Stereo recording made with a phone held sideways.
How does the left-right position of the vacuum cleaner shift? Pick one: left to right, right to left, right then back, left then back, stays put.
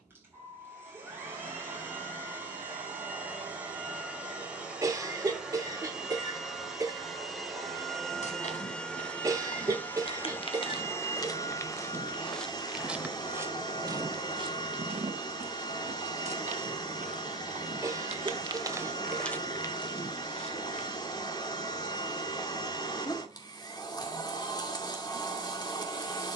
right to left.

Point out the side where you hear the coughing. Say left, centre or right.
right.